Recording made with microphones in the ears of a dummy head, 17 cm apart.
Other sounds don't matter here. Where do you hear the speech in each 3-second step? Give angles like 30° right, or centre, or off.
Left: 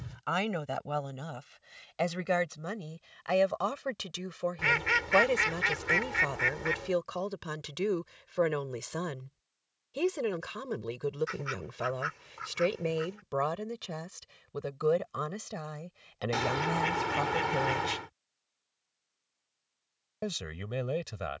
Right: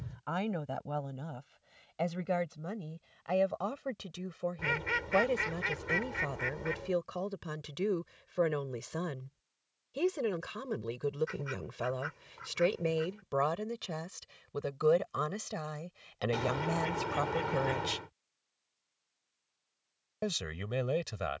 60° left, 50° left, 40° left, 20° left, centre, 10° right, 10° right.